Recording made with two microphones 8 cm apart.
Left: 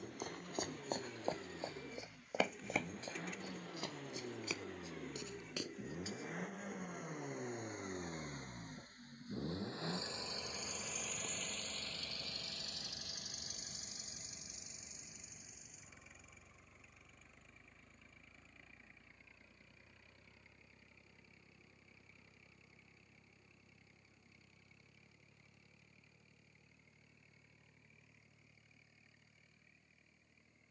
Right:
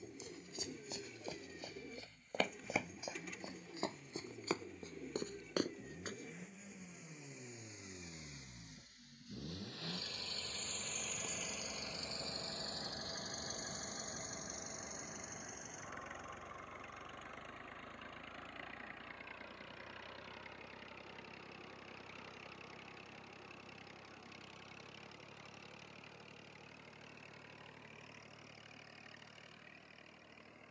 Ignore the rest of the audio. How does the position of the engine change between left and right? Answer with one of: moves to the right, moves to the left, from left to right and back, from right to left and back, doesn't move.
moves to the right.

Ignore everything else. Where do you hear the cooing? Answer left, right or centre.
centre.